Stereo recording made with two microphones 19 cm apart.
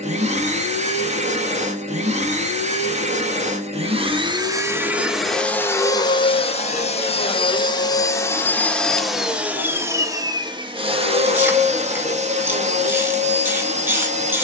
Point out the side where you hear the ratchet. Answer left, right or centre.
centre.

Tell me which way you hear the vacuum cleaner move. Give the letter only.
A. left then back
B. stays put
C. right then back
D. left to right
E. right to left
A.